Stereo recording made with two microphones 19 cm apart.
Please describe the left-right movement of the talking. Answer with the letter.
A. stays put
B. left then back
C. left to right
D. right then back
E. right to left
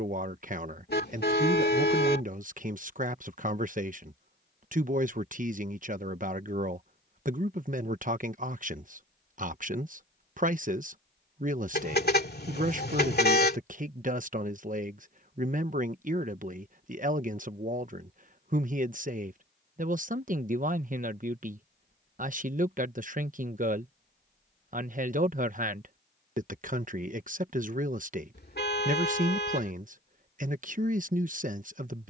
A.